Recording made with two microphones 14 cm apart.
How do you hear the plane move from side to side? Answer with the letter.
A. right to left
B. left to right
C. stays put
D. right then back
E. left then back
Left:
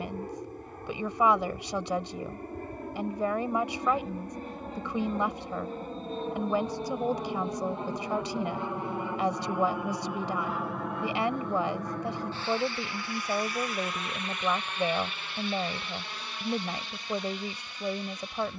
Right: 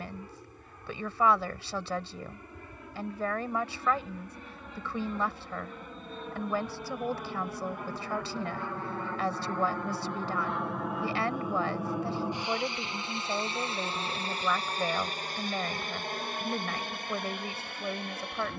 B.